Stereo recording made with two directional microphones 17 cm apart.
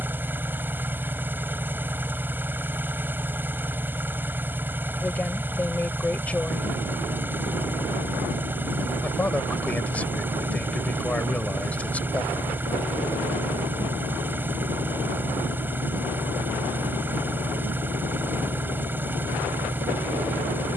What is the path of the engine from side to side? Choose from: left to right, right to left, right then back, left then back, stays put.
stays put.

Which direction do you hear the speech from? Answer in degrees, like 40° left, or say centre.
10° left.